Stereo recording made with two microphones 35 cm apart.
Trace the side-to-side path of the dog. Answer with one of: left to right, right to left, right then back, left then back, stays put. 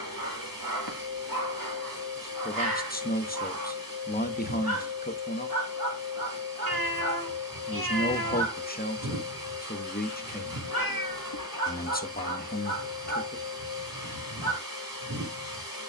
stays put.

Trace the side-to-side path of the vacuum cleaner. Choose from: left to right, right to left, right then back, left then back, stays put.
stays put.